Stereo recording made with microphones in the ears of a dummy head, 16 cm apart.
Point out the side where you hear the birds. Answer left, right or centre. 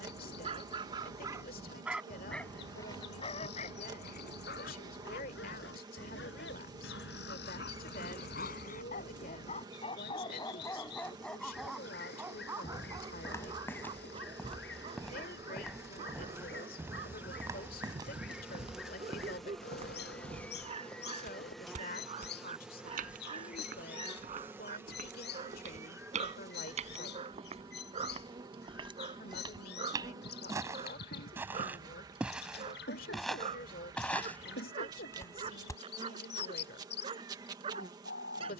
left.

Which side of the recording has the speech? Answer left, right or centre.
left.